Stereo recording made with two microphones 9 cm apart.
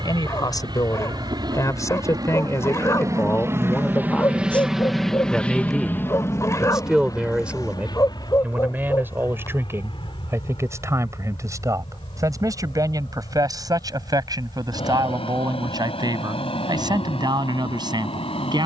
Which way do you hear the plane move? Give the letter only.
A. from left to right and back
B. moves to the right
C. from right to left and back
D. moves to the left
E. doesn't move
D.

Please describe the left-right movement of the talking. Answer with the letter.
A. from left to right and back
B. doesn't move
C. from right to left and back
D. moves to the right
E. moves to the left
D.